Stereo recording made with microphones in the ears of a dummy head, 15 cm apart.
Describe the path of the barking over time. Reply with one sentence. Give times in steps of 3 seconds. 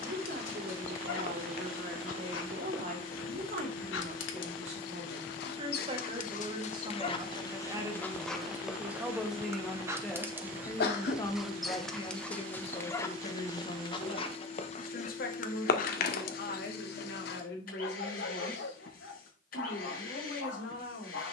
In this clip you hear the barking on the left from 0 s, in the centre from 9 s and on the left from 12 s.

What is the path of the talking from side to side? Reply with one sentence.
You can hear the talking travel towards the left.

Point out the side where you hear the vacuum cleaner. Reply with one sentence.
You can hear the vacuum cleaner on the left.